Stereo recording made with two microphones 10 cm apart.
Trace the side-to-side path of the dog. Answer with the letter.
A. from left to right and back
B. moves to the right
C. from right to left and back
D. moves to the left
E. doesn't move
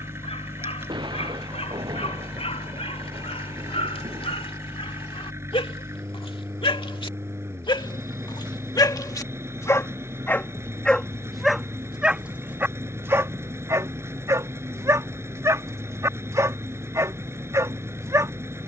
B.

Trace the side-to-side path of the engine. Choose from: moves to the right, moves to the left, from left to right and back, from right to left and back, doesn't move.
doesn't move.